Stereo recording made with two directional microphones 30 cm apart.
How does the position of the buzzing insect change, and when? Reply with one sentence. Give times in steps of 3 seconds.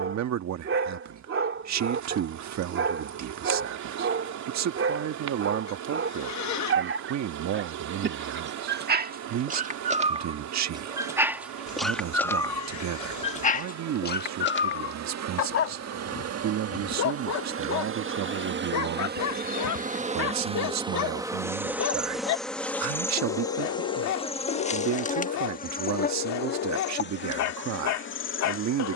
In this clip you hear the buzzing insect on the right from 0 s, in the centre from 21 s and on the left from 24 s.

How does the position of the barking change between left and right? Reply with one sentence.
In this clip you hear the barking go from the right side to the left.